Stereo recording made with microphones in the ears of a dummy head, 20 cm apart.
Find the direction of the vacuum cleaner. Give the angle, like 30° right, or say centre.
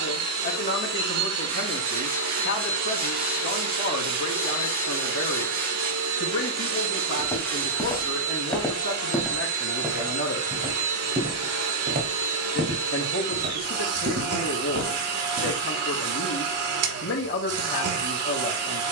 70° right.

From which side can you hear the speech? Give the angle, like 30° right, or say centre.
50° left.